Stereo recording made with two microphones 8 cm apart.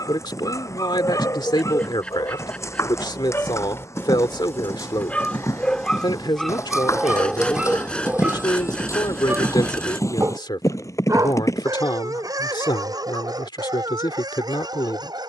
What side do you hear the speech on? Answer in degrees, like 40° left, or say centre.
80° left.